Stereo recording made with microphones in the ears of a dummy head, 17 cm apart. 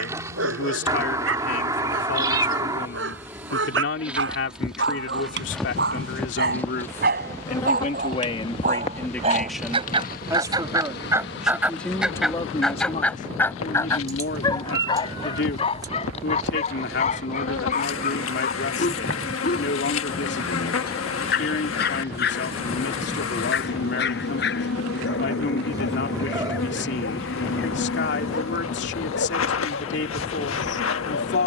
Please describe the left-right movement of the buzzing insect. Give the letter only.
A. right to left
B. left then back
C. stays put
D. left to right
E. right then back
A.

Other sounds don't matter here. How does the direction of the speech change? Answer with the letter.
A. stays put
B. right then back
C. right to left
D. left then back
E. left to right
B.